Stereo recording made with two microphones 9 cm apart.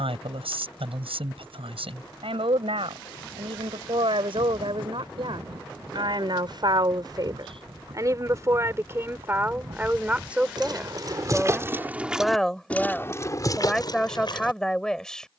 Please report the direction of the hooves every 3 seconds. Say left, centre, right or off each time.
off, right, right, right, left.